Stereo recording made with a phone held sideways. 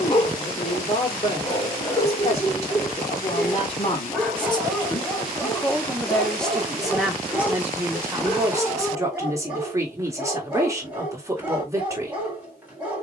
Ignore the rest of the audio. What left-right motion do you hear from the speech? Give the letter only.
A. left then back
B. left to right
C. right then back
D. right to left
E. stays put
B.